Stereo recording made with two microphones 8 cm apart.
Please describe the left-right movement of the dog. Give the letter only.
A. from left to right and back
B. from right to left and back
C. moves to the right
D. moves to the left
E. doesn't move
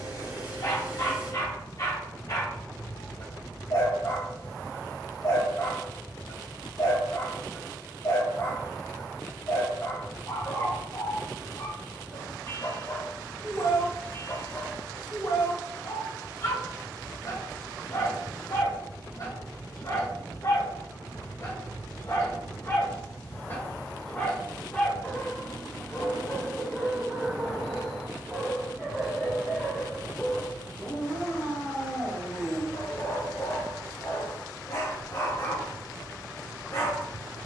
A.